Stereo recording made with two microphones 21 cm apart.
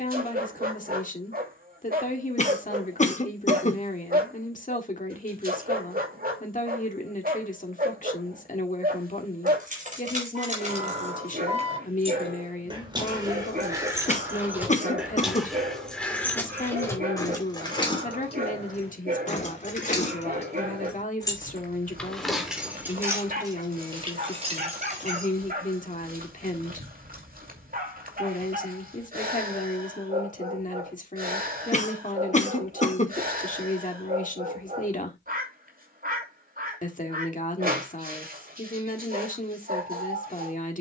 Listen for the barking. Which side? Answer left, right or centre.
right.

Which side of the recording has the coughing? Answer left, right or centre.
left.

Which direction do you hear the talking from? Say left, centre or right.
left.